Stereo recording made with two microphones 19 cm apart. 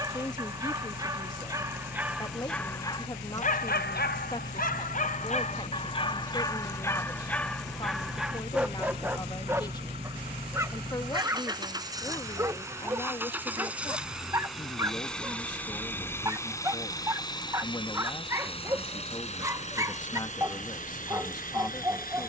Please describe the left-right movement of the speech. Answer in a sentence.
In this clip you hear the speech stay in one place.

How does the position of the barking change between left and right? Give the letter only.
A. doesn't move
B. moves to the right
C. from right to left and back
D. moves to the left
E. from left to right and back
C.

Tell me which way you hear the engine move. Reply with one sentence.
You can hear the engine go from the right side to the left.